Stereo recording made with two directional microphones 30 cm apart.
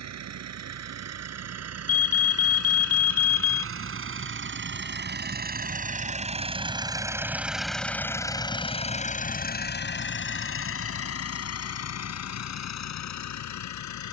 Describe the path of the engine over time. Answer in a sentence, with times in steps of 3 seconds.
In this clip you hear the engine on the right from 0 s, in the centre from 6 s and on the left from 9 s.